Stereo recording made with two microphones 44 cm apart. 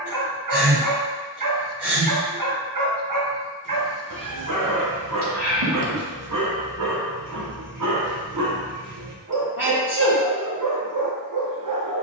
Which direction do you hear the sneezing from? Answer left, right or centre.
right.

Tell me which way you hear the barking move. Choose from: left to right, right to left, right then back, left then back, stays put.
stays put.